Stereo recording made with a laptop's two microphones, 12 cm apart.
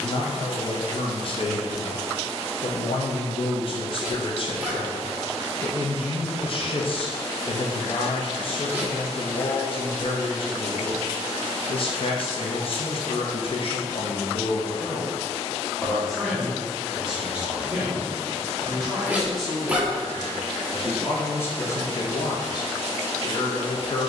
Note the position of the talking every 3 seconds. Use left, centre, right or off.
left, left, left, left, left, centre, centre, left.